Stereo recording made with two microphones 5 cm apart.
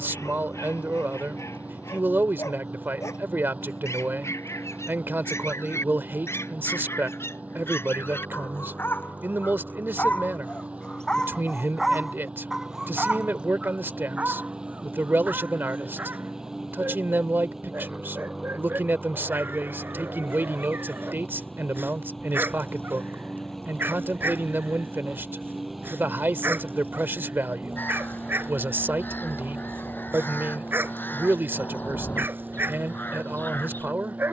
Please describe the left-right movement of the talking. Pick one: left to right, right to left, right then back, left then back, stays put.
stays put.